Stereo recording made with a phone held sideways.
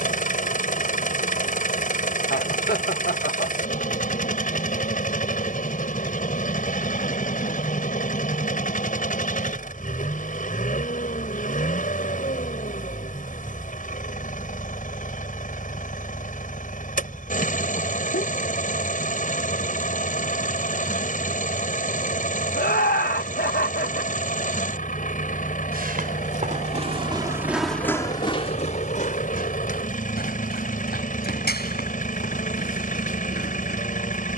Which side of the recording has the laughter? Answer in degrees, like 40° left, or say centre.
70° left.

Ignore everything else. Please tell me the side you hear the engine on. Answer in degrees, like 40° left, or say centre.
50° left.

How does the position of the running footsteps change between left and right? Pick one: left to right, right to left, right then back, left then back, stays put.
right to left.